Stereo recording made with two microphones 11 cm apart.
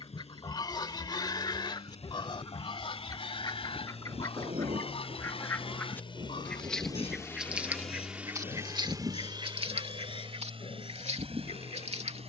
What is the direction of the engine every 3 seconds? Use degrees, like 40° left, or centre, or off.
80° left, 70° left, 10° left, 60° right.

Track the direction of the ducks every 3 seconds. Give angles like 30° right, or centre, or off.
40° left, 30° left, 20° right, 70° right.